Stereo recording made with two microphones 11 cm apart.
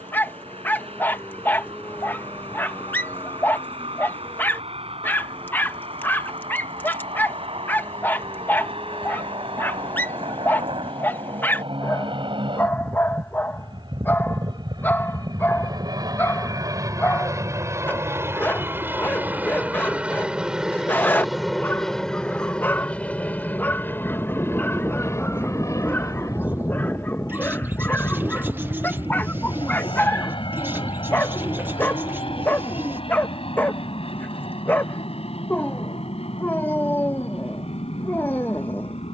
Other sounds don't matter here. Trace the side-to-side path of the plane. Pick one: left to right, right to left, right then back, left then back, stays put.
right to left.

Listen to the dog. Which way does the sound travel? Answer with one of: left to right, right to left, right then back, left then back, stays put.
stays put.